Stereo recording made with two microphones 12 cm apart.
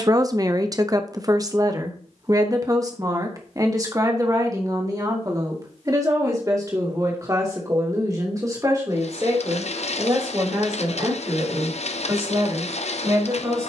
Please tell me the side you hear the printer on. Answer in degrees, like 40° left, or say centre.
60° left.